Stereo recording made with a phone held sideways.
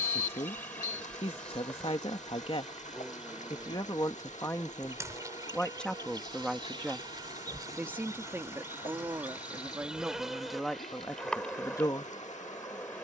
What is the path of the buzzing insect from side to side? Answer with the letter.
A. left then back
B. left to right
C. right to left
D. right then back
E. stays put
D.